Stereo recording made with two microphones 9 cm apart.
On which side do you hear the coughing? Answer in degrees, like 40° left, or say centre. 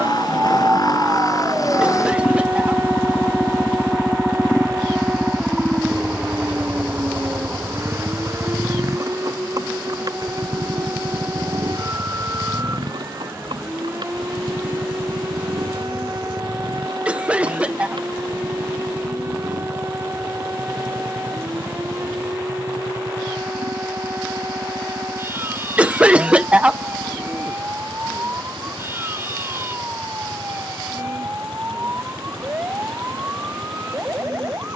10° right.